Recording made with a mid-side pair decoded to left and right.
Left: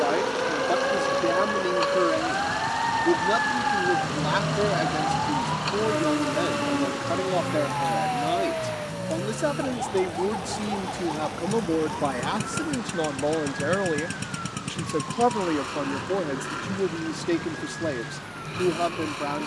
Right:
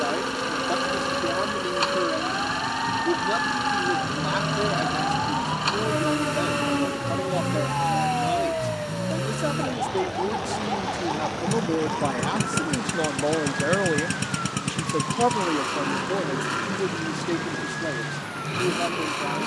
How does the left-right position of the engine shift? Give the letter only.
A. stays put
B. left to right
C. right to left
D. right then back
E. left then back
A.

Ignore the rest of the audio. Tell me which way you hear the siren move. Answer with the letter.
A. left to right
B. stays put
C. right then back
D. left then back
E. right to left
A.